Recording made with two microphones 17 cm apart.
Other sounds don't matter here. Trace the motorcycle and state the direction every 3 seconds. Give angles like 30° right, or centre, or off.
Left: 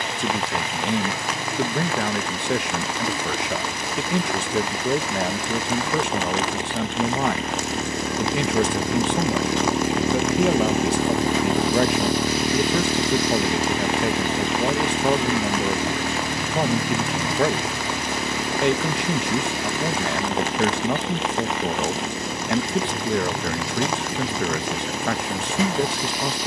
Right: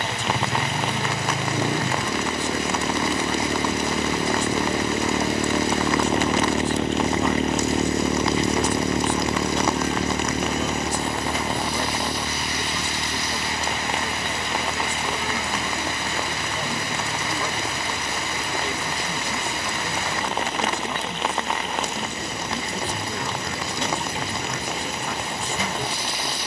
70° right, 60° right, 30° right, 20° left, 50° left, 70° left, 70° left, 80° left, 80° left.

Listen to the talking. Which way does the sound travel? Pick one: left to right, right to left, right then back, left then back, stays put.
stays put.